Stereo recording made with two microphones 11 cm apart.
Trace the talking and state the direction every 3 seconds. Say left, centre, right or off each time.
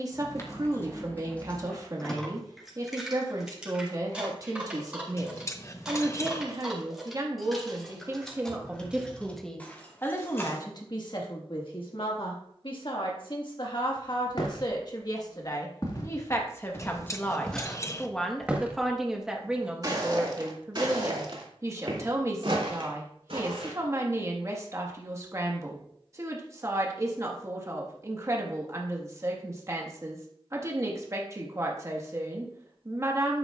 right, right, right, left, left, left, centre, right, right, right, right.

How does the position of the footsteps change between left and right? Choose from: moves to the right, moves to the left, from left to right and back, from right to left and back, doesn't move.
moves to the right.